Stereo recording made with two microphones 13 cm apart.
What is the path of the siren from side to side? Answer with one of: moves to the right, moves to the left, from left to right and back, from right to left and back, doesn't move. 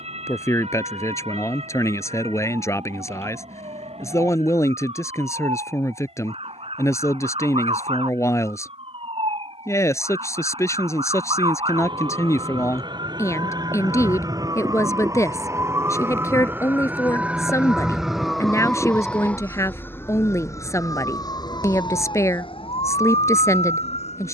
moves to the left.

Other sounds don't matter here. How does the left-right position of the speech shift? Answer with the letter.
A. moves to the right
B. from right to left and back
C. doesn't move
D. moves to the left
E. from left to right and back
C.